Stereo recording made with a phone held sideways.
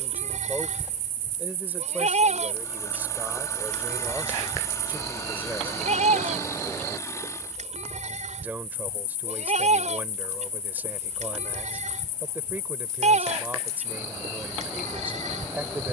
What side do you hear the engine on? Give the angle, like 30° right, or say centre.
20° left.